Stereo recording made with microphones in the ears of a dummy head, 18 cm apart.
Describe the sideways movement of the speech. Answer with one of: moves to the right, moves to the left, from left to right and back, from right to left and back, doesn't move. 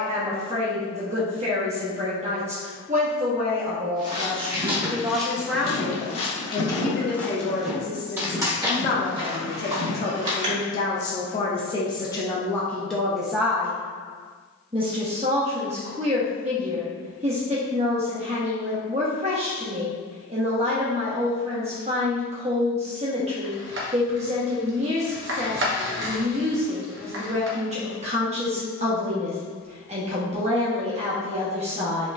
from right to left and back.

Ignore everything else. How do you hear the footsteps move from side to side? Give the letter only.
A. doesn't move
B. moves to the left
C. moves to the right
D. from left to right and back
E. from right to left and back
E.